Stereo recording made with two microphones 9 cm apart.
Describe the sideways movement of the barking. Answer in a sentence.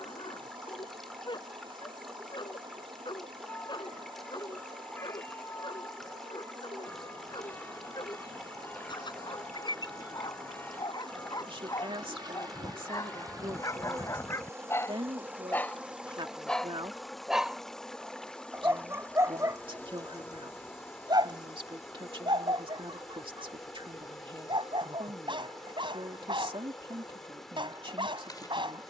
You can hear the barking travel towards the right.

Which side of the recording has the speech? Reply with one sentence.
You can hear the speech on the right.